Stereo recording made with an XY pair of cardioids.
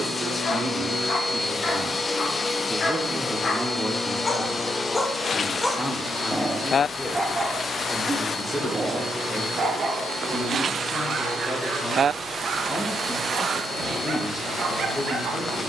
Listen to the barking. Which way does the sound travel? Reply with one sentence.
You can hear the barking move from left to right.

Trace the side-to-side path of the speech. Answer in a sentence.
In this clip you hear the speech travel towards the left.